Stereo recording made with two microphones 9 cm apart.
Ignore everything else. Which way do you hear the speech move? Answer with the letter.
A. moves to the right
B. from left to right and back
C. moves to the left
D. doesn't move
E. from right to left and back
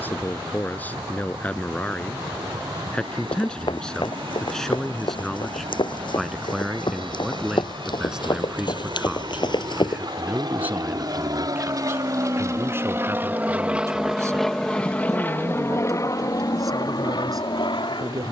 A.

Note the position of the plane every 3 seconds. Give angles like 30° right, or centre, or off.
80° right, 70° right, 70° right, 50° right, 20° right, 40° left.